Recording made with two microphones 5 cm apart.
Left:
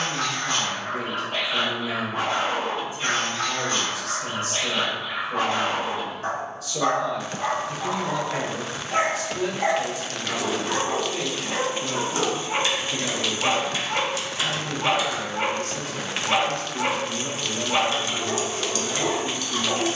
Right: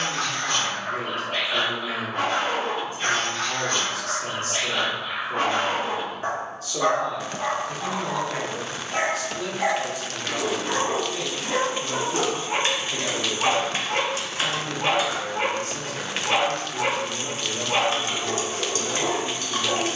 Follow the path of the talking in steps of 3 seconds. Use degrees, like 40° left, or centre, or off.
40° right, 40° right, 20° right, 20° left, 10° right, 40° right, 40° right.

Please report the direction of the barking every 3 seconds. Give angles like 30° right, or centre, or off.
60° right, 50° right, 10° right, 30° right, 60° right, 60° right, 60° right.